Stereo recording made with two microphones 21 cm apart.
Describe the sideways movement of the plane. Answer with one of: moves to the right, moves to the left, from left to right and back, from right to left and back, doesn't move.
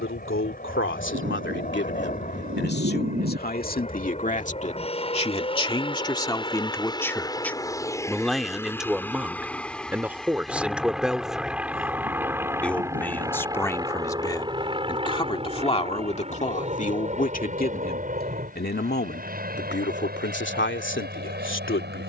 moves to the right.